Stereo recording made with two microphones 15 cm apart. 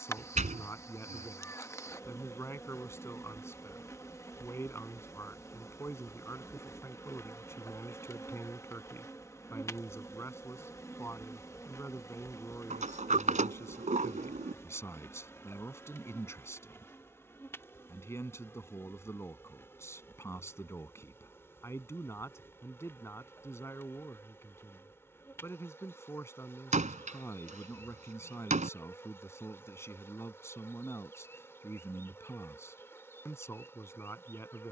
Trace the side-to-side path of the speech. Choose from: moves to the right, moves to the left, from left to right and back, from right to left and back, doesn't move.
doesn't move.